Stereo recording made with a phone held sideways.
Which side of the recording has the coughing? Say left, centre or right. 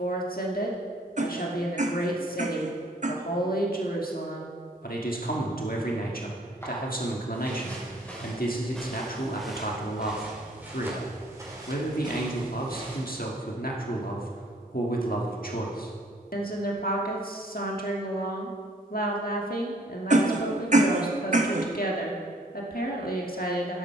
right.